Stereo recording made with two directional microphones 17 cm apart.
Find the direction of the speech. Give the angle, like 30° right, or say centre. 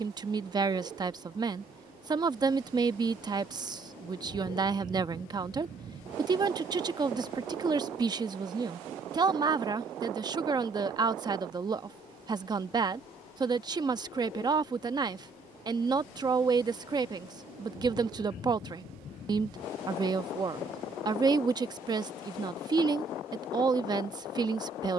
30° right.